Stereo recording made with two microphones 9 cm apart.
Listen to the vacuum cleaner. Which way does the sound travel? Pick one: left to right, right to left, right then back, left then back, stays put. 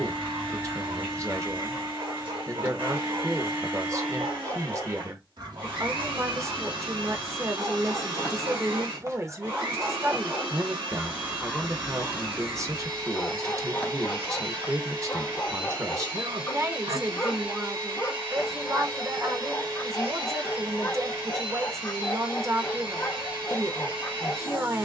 stays put.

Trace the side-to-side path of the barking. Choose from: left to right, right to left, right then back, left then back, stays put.
right to left.